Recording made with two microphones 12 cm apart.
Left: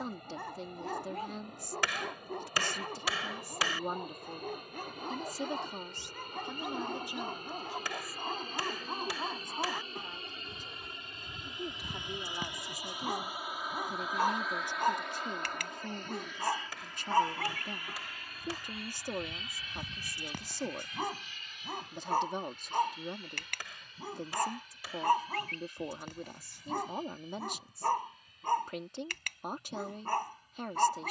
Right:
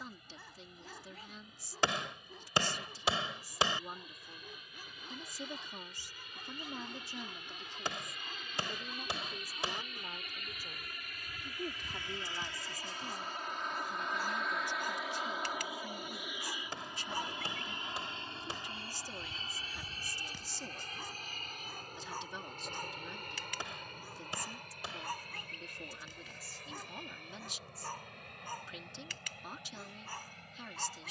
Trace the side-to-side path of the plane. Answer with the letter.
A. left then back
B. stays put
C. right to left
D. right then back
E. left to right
E.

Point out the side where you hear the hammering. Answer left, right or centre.
right.